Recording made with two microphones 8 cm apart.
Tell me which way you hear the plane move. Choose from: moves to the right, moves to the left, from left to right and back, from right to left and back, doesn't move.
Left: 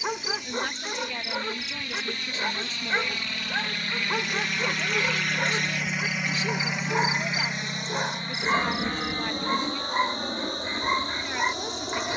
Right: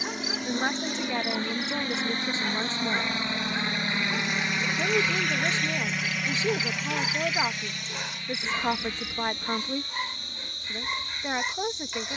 moves to the left.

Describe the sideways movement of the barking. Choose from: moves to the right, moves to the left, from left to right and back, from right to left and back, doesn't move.
doesn't move.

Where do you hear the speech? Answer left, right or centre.
right.